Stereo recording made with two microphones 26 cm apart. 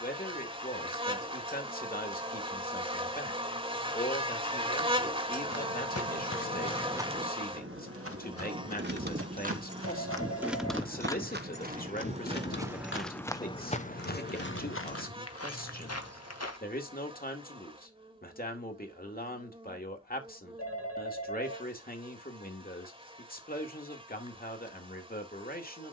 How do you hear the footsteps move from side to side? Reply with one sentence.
In this clip you hear the footsteps move from left to right and back again.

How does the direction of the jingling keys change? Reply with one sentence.
You can hear the jingling keys go from the right side to the left.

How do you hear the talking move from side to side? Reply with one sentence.
You can hear the talking stay put.